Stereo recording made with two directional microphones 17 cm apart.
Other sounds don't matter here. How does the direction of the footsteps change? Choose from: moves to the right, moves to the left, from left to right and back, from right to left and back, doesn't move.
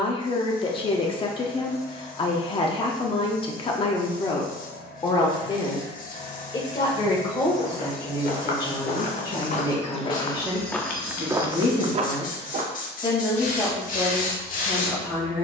moves to the right.